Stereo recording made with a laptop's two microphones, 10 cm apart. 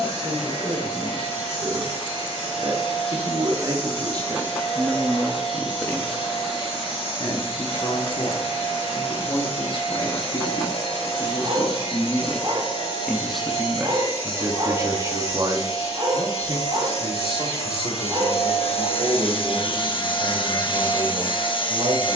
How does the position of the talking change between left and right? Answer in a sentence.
In this clip you hear the talking move from right to left and back again.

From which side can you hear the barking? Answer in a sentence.
In this clip you hear the barking on the right.